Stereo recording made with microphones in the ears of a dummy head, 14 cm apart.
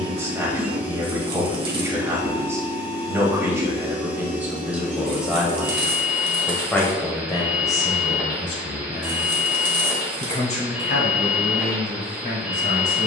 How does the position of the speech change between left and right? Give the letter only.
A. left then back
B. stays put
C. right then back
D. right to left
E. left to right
D.